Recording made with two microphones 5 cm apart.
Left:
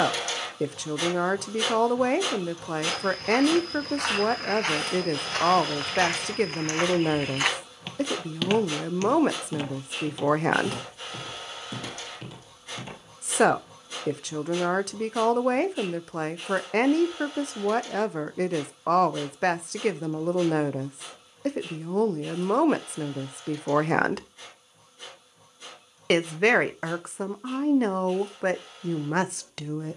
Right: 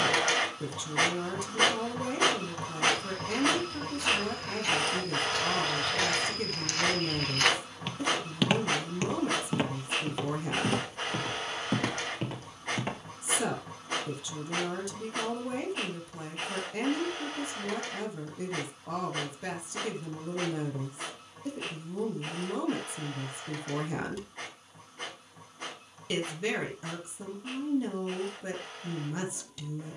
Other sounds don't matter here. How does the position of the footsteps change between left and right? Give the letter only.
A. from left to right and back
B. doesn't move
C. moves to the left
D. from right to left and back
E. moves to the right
E.